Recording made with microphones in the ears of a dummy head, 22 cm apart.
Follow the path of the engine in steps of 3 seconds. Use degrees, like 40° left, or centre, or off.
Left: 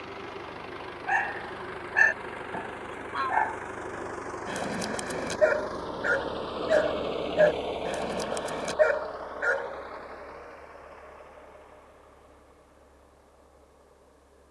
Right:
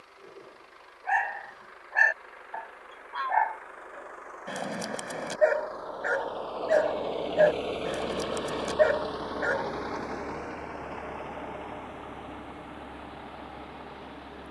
70° left, 50° left, centre, 60° right, 80° right.